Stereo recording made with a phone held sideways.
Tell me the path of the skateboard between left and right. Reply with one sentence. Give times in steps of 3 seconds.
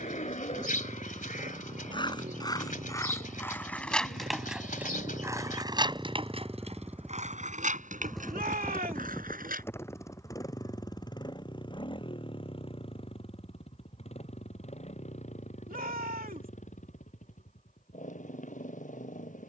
In this clip you hear the skateboard on the left from 0 s, in the centre from 3 s, on the right from 6 s and not at all from 12 s.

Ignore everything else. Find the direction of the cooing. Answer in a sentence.
In this clip you hear the cooing on the left.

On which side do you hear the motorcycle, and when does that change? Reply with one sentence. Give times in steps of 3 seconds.
You can hear the motorcycle on the right from 0 s, in the centre from 6 s and on the left from 9 s.